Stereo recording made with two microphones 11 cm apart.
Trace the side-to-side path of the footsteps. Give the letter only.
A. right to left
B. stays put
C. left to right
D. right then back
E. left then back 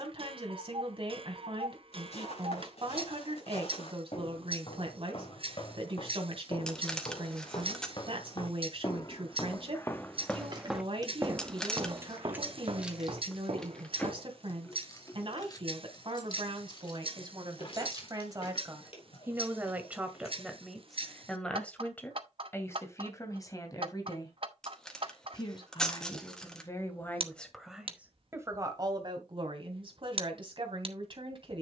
C.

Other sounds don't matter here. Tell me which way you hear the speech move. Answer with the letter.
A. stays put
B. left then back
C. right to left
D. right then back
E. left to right
B.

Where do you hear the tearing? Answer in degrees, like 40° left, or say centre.
10° left.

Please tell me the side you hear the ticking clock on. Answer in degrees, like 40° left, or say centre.
60° right.